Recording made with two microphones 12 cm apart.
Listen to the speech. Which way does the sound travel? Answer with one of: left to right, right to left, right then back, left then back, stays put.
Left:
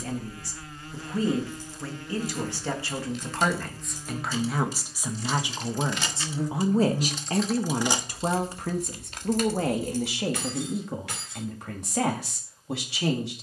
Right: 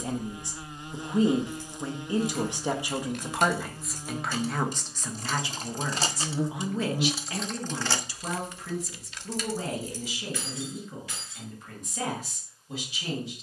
right to left.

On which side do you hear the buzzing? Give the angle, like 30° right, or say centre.
20° right.